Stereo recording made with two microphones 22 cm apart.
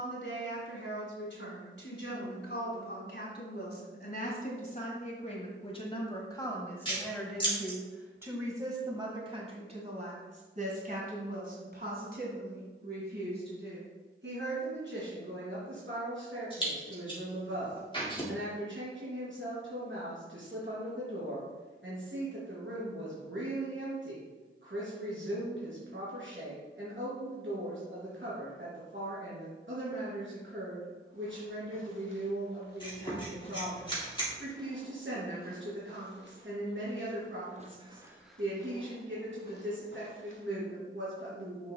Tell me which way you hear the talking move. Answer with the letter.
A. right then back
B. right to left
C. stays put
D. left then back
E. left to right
E.